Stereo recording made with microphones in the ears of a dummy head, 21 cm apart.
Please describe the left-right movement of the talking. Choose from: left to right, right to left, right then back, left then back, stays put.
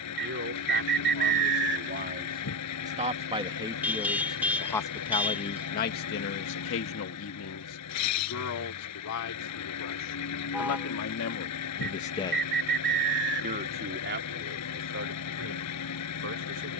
left then back.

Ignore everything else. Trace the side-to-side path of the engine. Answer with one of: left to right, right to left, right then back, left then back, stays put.
stays put.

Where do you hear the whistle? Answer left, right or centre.
right.